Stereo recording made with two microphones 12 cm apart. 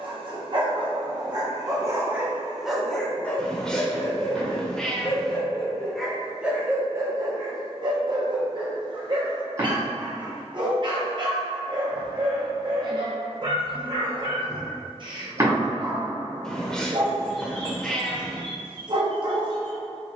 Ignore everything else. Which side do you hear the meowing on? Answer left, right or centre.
centre.